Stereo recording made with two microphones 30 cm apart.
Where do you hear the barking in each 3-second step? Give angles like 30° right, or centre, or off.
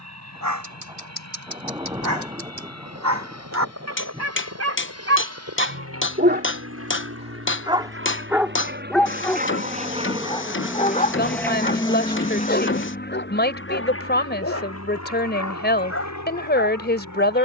70° right, 50° right, 20° right, 20° left, 40° left, 50° left.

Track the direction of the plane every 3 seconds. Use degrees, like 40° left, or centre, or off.
70° right, 60° right, 50° right, 10° right, 40° left, 60° left.